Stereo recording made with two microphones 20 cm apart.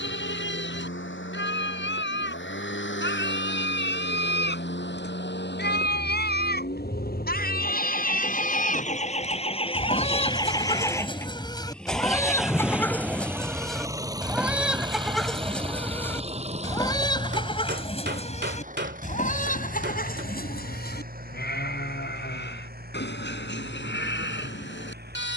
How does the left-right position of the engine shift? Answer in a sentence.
You can hear the engine travel towards the right.